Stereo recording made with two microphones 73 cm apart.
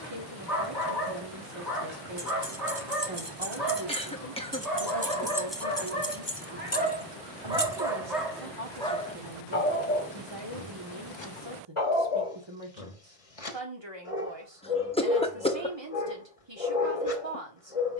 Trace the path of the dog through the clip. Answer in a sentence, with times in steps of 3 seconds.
In this clip you hear the dog on the right from 0 s, in the centre from 6 s and on the left from 9 s.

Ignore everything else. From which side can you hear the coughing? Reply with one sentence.
In this clip you hear the coughing in the centre.